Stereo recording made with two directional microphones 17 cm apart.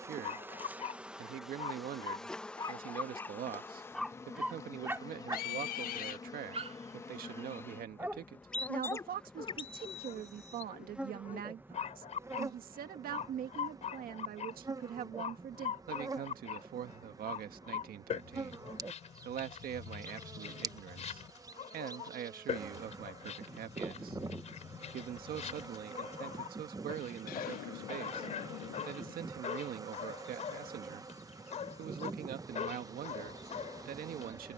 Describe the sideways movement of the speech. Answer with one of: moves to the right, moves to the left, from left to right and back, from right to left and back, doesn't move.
doesn't move.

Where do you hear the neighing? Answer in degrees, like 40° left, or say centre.
60° left.